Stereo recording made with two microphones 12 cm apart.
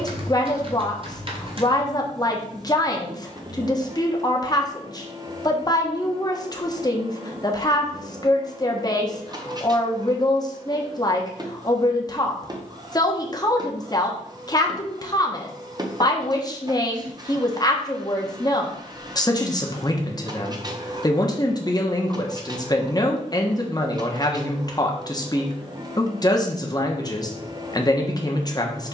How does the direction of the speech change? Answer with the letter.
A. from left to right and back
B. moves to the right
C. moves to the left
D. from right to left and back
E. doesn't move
E.